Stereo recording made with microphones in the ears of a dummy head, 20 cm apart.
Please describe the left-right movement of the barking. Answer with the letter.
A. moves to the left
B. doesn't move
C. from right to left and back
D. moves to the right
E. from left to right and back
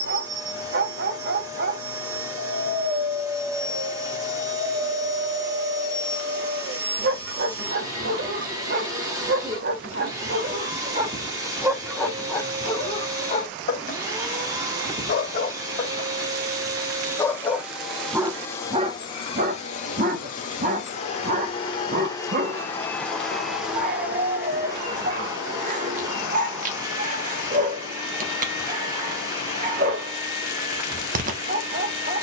C.